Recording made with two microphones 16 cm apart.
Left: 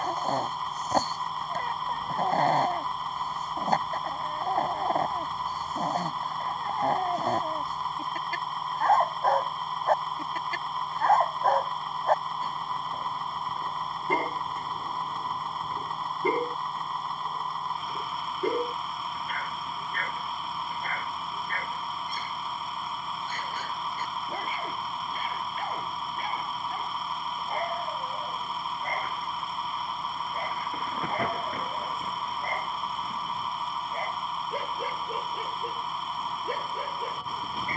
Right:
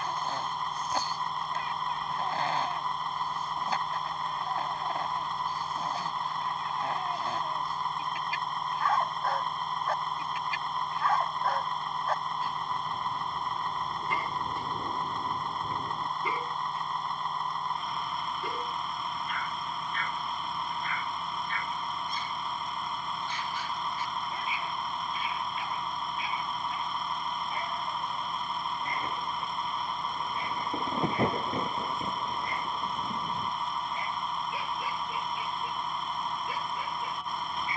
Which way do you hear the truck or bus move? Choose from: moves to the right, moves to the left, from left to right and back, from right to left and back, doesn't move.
doesn't move.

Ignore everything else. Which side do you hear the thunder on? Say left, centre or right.
right.